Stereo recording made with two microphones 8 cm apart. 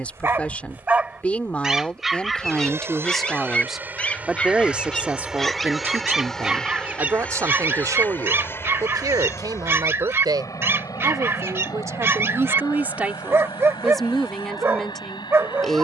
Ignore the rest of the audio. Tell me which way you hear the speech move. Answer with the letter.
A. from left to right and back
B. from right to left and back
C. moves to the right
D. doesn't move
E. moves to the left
A.